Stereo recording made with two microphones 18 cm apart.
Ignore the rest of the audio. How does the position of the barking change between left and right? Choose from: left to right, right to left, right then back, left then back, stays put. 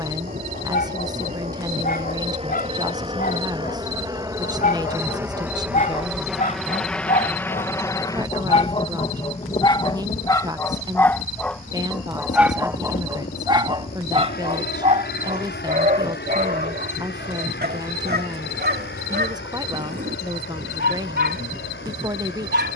left to right.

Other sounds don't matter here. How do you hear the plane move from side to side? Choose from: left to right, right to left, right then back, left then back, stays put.
right to left.